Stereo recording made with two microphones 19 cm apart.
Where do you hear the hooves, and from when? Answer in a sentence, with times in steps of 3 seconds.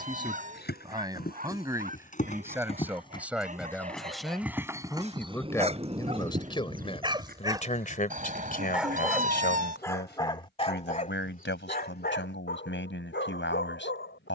In this clip you hear the hooves on the left from 0 s, in the centre from 3 s, on the right from 6 s and not at all from 9 s.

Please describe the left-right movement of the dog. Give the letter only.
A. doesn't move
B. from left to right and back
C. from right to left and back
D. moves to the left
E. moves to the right
D.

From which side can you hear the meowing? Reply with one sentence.
In this clip you hear the meowing on the right.